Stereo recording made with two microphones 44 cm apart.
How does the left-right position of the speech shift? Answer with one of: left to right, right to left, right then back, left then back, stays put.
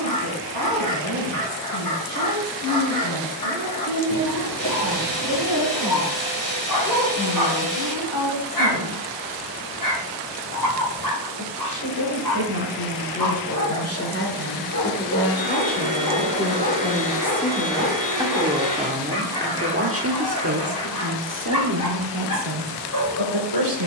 left to right.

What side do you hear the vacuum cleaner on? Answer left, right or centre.
left.